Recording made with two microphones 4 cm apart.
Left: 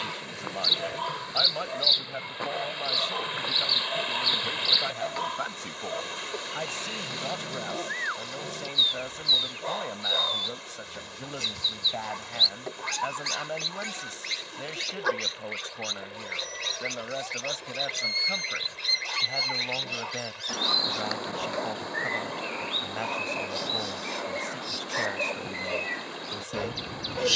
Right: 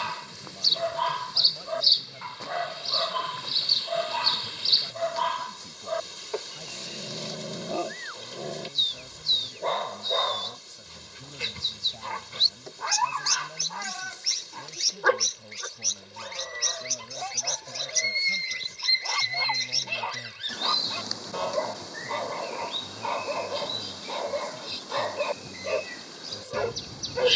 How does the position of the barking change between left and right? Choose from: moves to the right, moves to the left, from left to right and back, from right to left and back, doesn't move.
doesn't move.